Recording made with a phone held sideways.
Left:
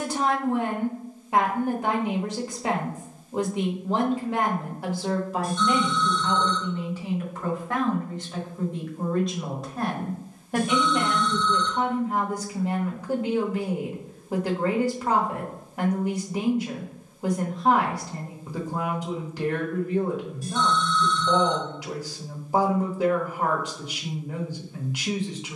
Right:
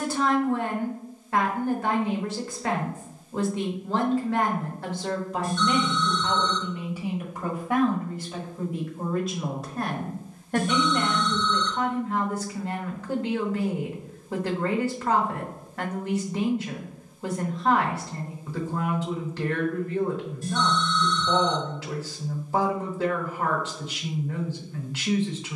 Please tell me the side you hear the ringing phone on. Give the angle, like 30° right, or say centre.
10° left.